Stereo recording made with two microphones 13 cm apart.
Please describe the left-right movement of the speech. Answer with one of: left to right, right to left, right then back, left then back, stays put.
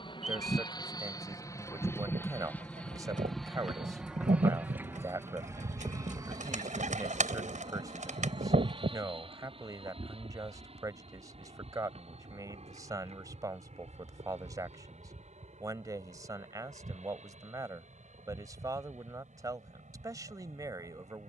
stays put.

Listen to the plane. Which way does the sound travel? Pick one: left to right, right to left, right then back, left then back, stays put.
left to right.